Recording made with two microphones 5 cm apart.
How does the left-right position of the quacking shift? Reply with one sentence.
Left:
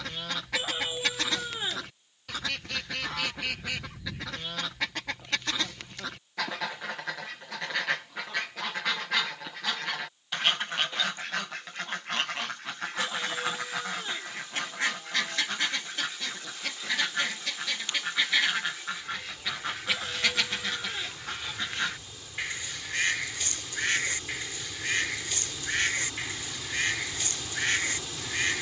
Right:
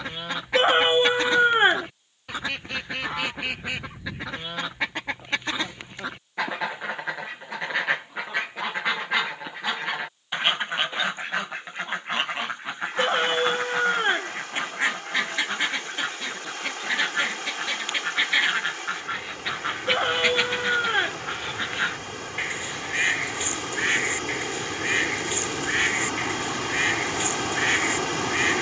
In this clip you hear the quacking stay put.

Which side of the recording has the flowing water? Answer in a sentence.
You can hear the flowing water on the right.